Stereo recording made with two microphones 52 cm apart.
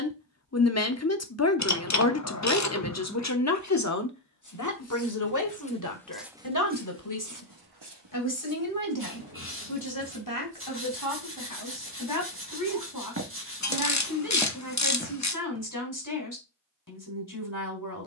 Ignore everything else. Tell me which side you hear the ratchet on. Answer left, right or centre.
left.